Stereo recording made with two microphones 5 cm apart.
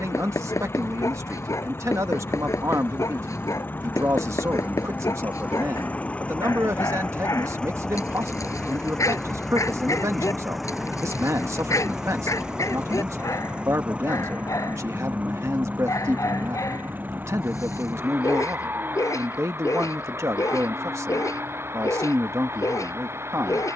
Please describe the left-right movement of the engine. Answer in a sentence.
You can hear the engine move to the right.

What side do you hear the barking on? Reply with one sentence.
You can hear the barking on the left.